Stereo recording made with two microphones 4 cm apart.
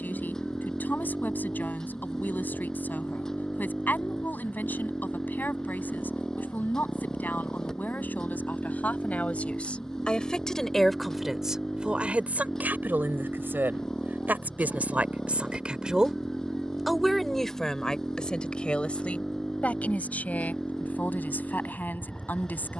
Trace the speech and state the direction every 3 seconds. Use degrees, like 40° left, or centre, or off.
50° left, 50° left, 50° left, 10° left, 50° right, 10° right, 30° left, 50° left.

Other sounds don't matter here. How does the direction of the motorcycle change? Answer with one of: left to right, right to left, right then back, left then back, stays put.
stays put.